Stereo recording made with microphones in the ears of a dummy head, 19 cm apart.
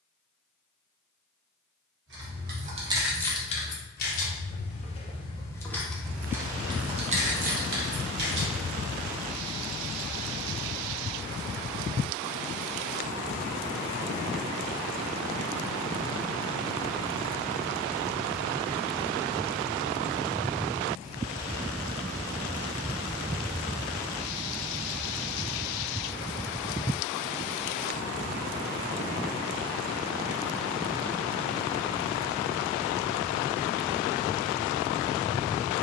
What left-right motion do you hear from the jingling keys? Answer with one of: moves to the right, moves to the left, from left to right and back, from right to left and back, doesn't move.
from right to left and back.